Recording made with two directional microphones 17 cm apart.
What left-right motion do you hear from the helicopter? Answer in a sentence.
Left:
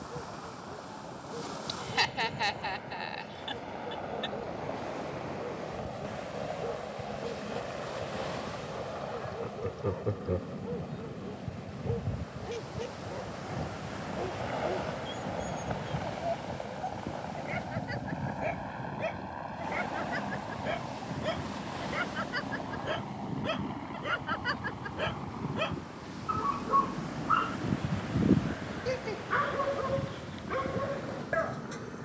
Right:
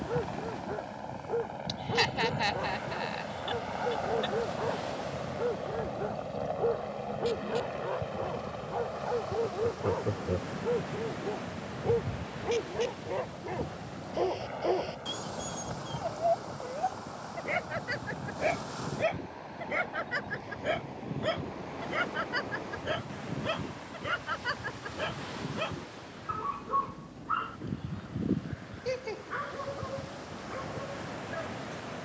In this clip you hear the helicopter move from right to left.